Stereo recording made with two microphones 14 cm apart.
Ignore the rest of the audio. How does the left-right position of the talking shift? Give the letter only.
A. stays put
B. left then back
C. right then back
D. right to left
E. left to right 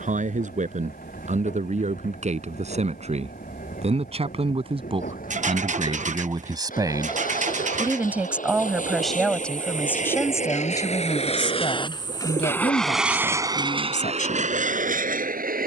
D.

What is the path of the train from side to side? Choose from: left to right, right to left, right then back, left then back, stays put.
left to right.